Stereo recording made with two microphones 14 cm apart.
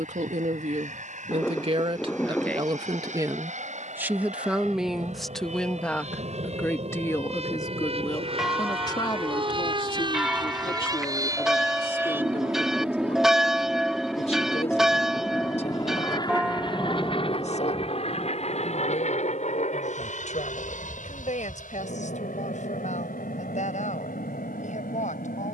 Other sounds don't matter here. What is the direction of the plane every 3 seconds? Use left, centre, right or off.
right, right, right, right, centre, left, left, left, left.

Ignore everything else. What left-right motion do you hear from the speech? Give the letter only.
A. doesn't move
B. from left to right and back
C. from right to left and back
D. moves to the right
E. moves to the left
E.